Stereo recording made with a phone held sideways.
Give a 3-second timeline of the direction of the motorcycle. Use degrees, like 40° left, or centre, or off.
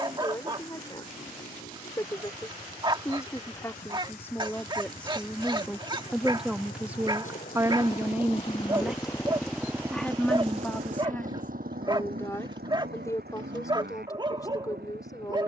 70° left, 70° left, 50° left, 30° right, 80° right.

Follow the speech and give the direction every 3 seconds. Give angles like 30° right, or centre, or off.
20° left, 10° left, 10° right, 10° left, 20° left.